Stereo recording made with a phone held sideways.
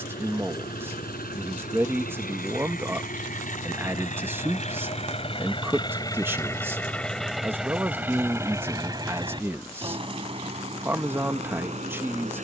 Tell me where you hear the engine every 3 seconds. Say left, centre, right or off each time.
left, left, centre, right.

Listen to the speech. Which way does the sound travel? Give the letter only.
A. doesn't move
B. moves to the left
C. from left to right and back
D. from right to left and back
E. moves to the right
A.